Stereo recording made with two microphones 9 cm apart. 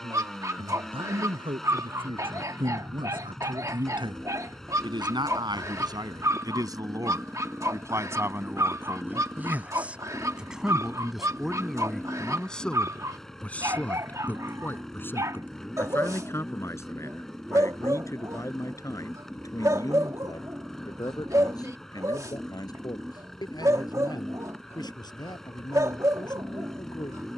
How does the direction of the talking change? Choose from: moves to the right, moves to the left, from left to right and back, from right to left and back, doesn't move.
moves to the left.